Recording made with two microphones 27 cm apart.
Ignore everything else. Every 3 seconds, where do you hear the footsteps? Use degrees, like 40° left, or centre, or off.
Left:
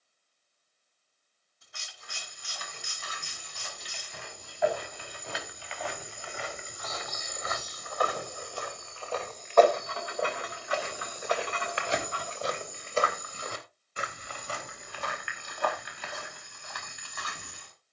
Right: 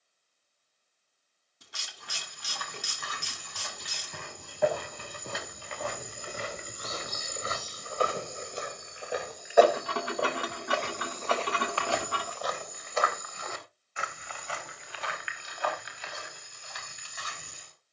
60° right, 50° right, 30° right, centre, 30° left, 50° left.